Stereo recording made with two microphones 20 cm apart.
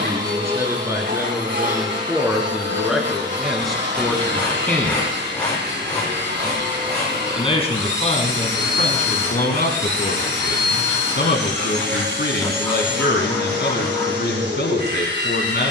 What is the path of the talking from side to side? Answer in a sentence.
In this clip you hear the talking move to the left.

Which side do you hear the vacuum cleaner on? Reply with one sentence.
In this clip you hear the vacuum cleaner on the right.